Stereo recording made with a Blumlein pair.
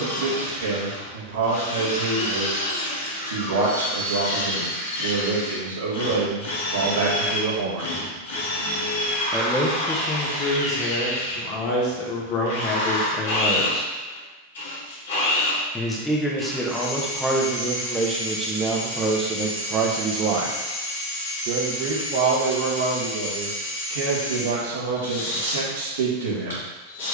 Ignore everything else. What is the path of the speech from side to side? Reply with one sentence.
In this clip you hear the speech go left and come back.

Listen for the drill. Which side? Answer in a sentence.
You can hear the drill on the left.